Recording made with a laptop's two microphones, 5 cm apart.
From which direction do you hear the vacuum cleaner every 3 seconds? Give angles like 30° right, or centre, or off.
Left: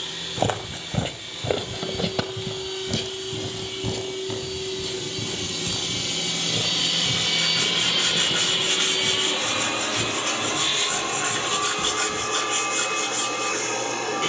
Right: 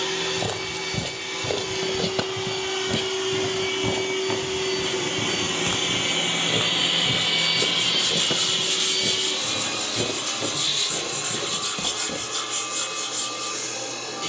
80° right, 60° right, 10° right, 40° left, 50° left.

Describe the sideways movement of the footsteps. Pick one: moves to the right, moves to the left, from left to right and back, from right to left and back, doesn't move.
moves to the right.